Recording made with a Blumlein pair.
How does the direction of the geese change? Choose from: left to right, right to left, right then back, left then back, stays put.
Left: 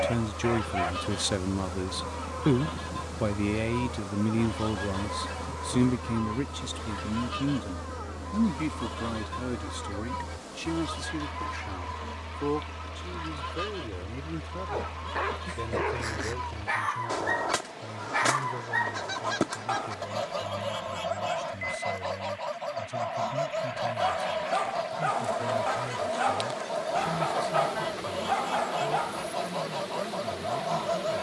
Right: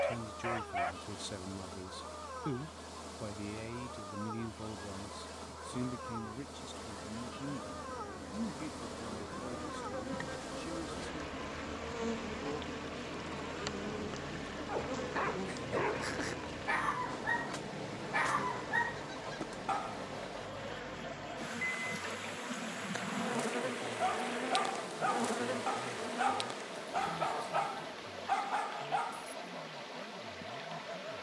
stays put.